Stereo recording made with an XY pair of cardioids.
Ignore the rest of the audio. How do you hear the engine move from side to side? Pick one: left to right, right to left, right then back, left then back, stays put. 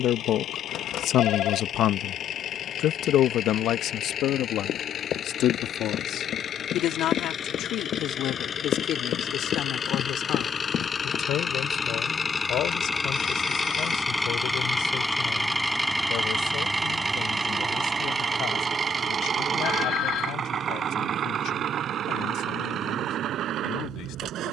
left to right.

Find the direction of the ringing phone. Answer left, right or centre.
left.